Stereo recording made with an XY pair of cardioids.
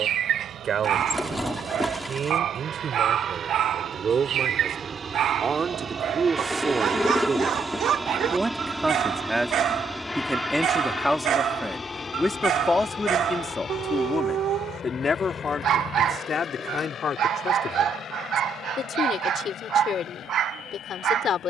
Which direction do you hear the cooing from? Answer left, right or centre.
centre.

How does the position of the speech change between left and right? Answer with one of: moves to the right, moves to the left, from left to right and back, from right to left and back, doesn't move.
moves to the left.